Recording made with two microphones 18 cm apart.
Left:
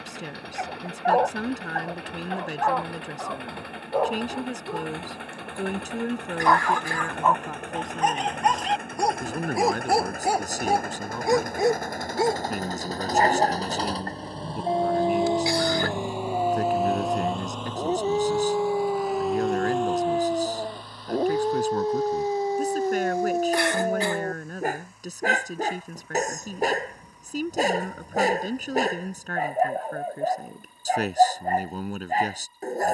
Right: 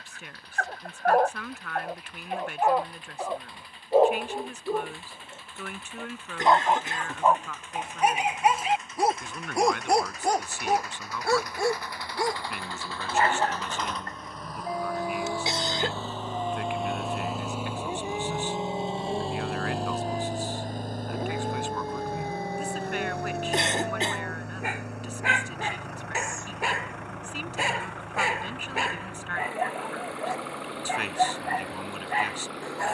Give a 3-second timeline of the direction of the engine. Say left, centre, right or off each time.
left, left, left, left, left, centre, right, right, right, right, right.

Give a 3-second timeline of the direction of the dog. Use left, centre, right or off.
centre, right, centre, centre, left, left, left, left, left, left, left.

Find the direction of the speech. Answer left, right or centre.
left.